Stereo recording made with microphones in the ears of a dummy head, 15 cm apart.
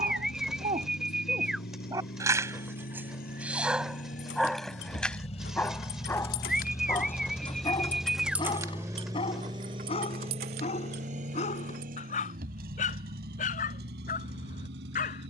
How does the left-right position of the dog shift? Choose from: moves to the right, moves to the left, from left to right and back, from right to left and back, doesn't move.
moves to the left.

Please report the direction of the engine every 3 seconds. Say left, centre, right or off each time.
left, left, centre, right, right.